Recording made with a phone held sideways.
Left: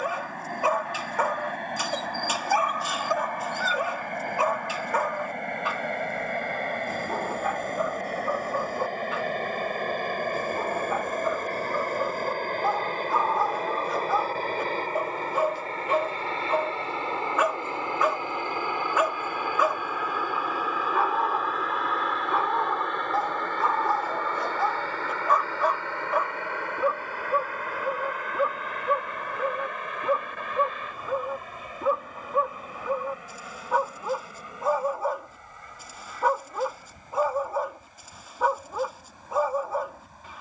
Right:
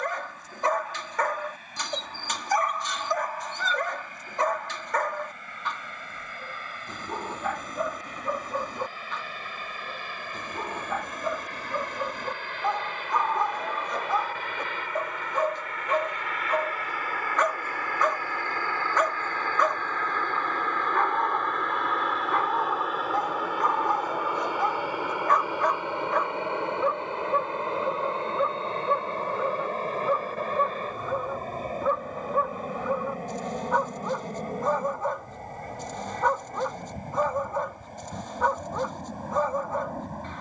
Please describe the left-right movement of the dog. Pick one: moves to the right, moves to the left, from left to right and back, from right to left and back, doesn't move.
doesn't move.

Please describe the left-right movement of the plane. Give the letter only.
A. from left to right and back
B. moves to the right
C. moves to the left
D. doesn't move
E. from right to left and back
B.